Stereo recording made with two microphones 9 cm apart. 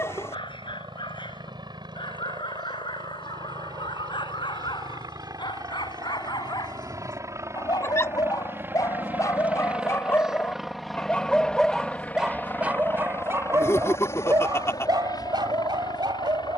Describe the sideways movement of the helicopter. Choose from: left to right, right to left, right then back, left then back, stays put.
right to left.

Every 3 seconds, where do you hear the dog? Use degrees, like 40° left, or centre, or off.
70° left, 60° left, 50° left, 20° left, 30° right, 60° right.